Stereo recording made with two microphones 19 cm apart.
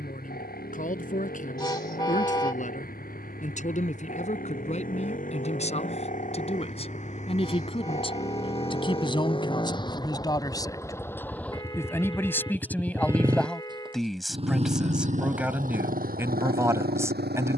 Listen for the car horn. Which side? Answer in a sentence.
In this clip you hear the car horn on the left.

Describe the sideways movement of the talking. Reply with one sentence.
In this clip you hear the talking go from the left side to the right.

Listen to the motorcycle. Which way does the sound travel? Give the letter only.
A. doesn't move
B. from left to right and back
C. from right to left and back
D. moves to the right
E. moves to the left
D.